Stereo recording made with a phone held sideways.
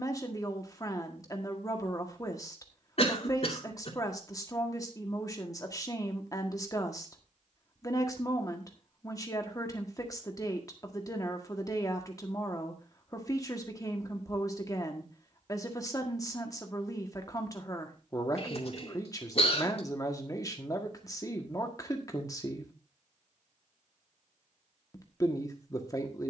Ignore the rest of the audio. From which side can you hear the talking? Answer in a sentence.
In this clip you hear the talking on the left.